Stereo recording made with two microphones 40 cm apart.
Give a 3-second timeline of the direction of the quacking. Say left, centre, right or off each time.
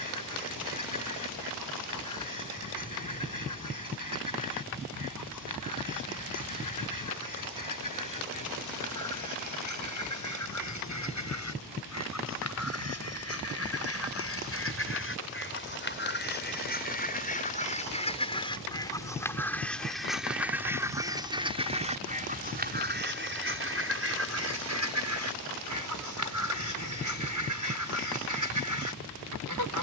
left, left, left, left, left, left, centre, right, right, right.